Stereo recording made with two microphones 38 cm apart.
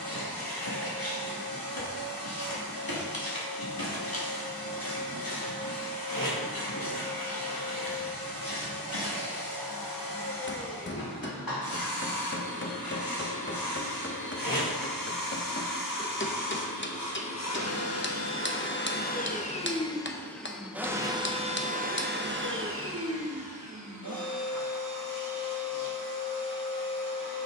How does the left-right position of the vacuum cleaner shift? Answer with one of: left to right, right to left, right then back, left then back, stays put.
left to right.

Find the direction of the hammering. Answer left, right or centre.
left.